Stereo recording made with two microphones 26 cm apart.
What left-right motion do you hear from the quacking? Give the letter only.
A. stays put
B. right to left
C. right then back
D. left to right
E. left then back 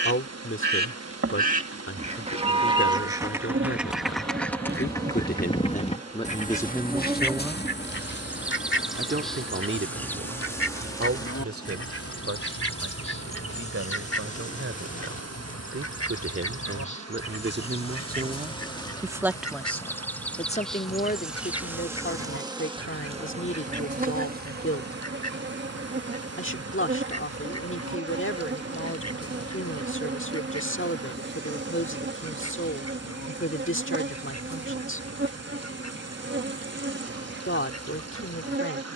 B.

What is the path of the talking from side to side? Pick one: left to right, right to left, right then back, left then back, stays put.
right then back.